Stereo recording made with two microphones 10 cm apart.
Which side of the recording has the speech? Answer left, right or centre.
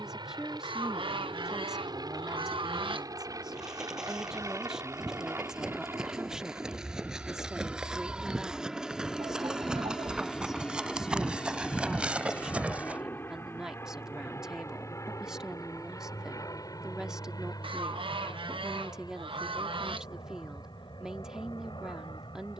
centre.